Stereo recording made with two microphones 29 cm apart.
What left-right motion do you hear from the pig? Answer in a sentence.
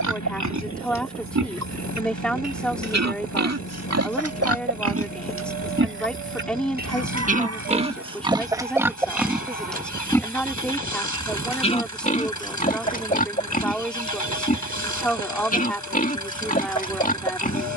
You can hear the pig move from right to left.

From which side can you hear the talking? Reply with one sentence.
You can hear the talking in the centre.